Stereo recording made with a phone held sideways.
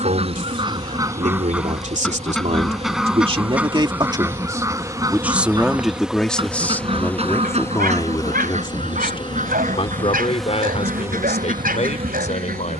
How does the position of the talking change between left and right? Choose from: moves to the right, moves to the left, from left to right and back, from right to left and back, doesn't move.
moves to the left.